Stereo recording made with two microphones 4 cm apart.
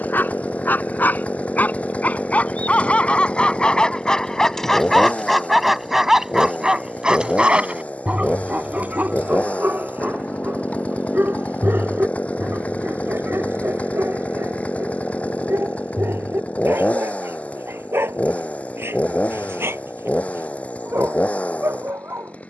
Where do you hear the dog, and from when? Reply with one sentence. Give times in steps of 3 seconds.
In this clip you hear the dog on the left from 0 s, in the centre from 3 s and on the right from 6 s.